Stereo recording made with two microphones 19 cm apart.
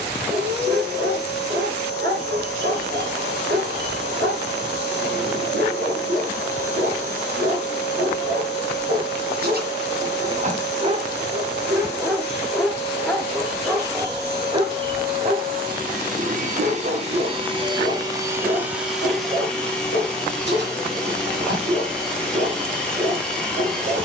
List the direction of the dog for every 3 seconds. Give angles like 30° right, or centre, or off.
70° right, 70° right, 70° right, 40° right, 10° right, 60° right, 70° right, 70° right.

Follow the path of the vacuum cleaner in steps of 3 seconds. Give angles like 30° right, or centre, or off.
70° right, 70° right, 70° right, 70° right, 60° right, 40° right, centre, 10° left.